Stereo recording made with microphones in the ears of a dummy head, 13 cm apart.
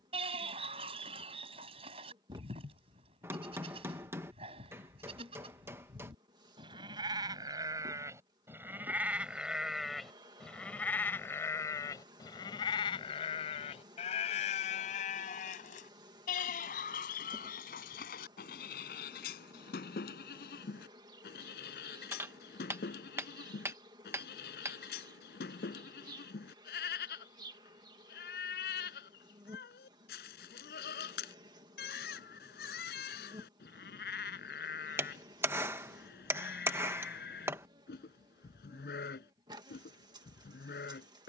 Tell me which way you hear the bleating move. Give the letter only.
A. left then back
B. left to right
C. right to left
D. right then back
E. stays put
C.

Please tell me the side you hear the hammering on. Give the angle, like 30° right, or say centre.
20° right.